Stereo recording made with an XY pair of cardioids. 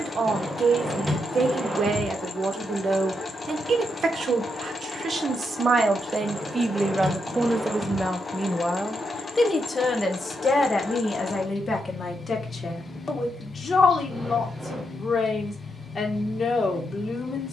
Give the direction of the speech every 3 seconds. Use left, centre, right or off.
right, right, centre, left, left, left.